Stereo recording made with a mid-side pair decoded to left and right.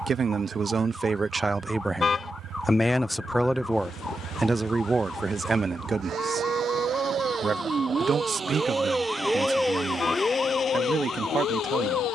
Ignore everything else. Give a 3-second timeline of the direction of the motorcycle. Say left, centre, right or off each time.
right, right, right, left.